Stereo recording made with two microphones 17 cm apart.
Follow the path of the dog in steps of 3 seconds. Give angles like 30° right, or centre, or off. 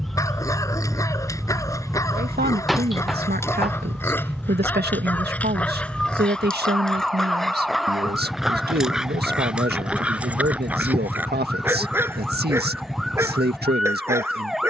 20° left, 10° left, centre, 10° right, 10° right.